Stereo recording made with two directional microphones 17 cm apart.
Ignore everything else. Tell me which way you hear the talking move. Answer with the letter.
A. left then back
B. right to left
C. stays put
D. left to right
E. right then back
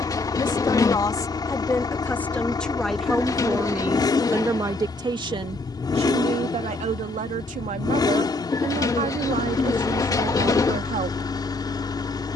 D.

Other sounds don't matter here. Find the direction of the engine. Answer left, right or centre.
left.